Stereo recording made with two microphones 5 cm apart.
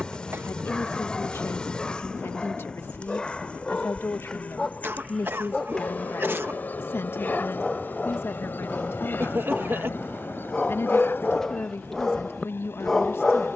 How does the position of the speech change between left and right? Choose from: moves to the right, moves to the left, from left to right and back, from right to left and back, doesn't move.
doesn't move.